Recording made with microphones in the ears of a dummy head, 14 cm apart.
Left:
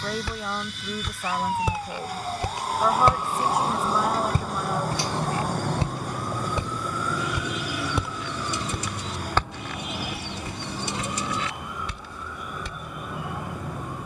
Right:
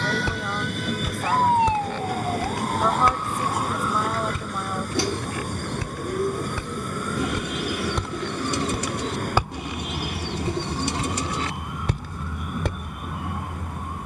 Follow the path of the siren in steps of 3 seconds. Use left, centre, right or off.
right, left, left, left, left.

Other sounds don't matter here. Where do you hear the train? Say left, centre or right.
right.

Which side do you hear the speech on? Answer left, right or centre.
centre.